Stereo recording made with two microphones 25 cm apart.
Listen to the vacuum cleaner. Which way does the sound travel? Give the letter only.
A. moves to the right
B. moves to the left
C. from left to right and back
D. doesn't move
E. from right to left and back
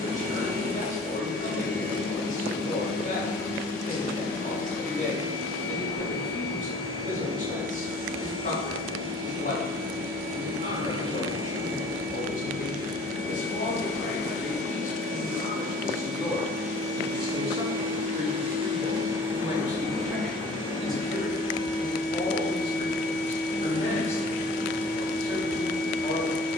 B.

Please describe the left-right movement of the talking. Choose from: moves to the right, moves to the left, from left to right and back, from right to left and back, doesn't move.
from left to right and back.